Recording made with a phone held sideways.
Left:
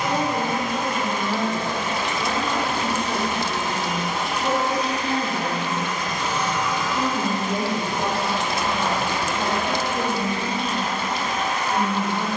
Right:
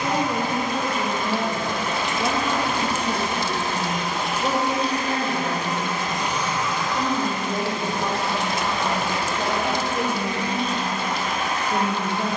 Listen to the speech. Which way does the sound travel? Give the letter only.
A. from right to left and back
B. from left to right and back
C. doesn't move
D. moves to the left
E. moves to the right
A.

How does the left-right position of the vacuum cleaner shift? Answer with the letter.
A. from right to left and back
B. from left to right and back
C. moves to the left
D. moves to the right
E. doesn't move
B.